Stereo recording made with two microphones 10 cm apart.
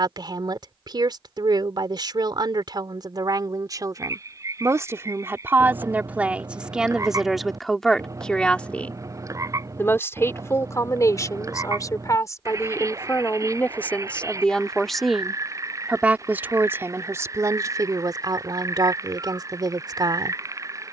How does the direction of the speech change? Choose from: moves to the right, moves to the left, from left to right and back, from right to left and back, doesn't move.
from right to left and back.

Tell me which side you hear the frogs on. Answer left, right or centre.
right.